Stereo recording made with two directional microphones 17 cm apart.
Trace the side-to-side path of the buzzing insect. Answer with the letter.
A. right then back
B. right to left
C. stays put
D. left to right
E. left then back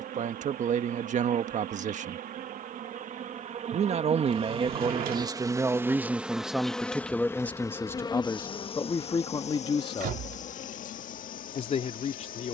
B.